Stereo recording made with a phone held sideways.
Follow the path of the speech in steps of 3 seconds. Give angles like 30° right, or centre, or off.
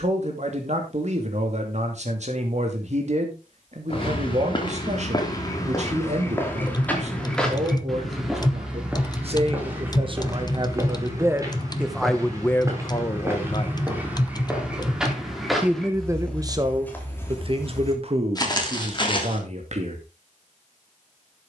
60° right, 60° right, 60° right, 30° right, 20° left, 30° right, 50° right.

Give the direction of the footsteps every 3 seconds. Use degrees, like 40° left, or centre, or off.
off, 30° left, 10° left, 20° right, 20° right, 10° left, 40° left.